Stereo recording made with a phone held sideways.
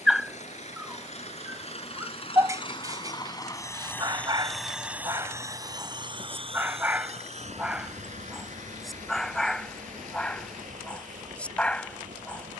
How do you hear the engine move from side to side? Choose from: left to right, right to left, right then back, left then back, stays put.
left to right.